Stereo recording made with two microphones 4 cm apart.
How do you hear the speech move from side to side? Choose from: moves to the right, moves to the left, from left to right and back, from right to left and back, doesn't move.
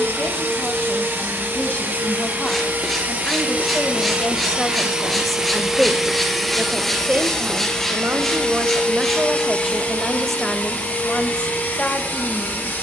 from left to right and back.